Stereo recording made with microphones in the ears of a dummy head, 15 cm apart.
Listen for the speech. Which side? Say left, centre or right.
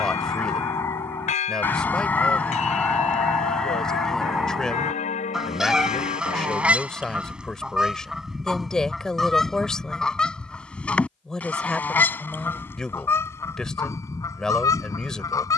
centre.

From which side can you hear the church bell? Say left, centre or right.
left.